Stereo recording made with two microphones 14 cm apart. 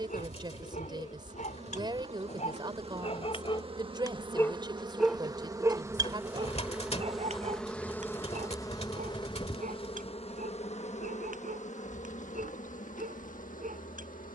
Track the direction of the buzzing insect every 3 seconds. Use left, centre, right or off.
right, right, centre, left, left.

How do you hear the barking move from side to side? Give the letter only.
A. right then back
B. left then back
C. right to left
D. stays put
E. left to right
E.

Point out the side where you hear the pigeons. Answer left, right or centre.
left.